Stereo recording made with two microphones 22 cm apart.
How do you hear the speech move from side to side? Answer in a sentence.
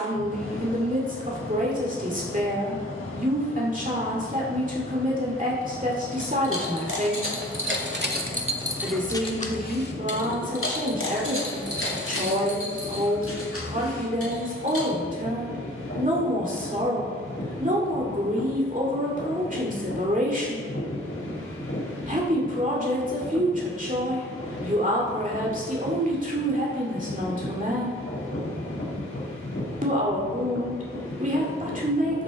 You can hear the speech stay put.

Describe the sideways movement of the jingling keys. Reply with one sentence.
You can hear the jingling keys travel towards the left.